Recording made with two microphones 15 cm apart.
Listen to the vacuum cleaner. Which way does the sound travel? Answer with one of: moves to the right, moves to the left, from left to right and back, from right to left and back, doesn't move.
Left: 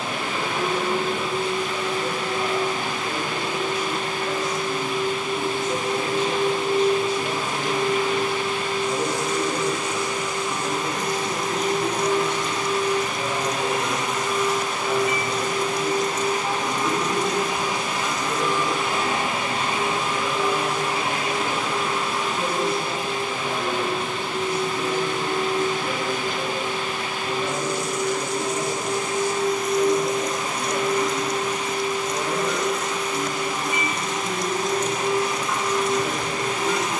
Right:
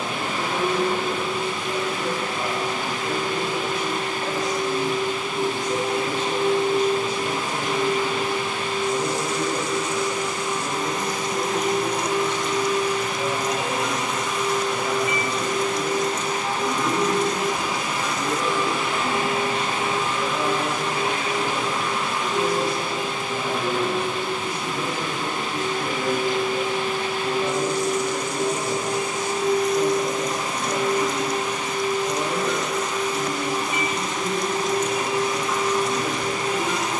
from right to left and back.